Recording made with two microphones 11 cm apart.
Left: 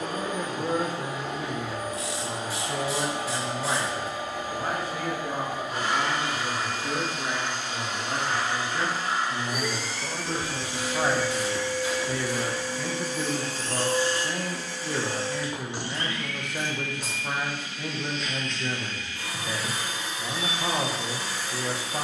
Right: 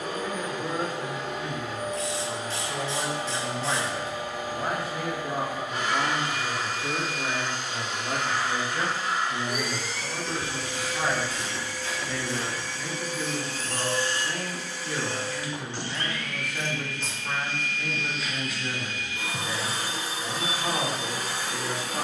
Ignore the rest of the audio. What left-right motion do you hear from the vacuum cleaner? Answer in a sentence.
In this clip you hear the vacuum cleaner move from left to right.